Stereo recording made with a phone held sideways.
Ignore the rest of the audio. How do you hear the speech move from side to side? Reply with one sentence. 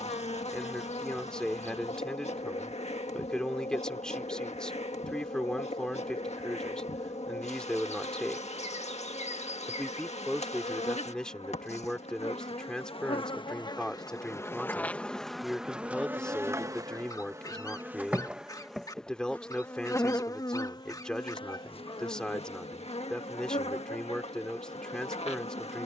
In this clip you hear the speech stay put.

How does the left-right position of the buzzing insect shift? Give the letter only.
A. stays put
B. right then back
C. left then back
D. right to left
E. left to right
B.